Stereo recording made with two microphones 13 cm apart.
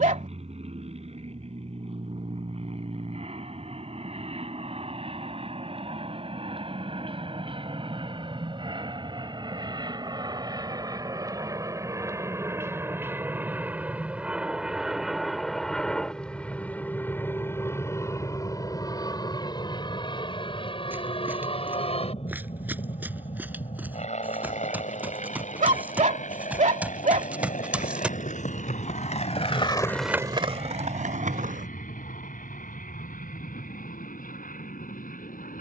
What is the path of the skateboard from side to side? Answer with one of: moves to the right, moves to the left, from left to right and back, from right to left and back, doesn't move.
moves to the right.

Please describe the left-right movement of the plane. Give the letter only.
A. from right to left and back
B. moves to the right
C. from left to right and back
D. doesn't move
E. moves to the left
E.